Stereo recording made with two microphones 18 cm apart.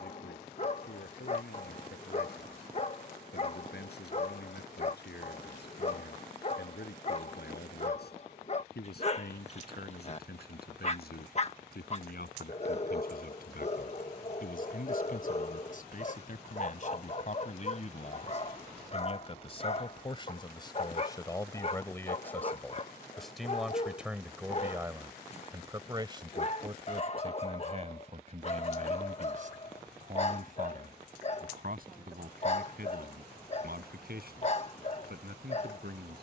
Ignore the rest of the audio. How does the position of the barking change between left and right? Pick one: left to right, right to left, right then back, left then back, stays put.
stays put.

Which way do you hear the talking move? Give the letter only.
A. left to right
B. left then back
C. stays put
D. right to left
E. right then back
A.